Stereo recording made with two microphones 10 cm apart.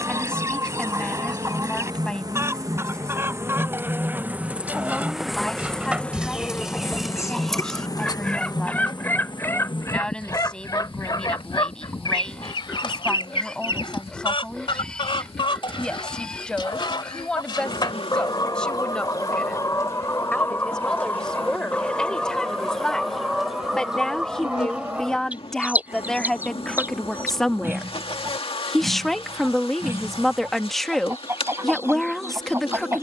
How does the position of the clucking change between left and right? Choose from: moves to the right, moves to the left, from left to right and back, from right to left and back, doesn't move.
from right to left and back.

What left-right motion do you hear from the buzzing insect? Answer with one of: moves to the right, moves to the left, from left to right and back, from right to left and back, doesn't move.
moves to the left.